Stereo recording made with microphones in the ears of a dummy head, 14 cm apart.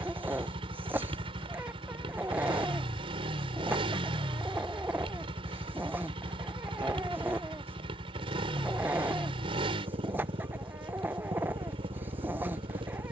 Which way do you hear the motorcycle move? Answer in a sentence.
You can hear the motorcycle stay put.